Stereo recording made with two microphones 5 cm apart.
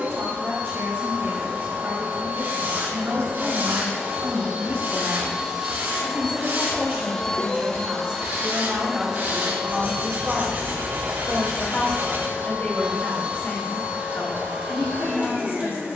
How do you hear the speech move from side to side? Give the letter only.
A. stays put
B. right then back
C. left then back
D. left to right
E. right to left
E.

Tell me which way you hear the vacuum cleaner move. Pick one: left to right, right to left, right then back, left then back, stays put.
left then back.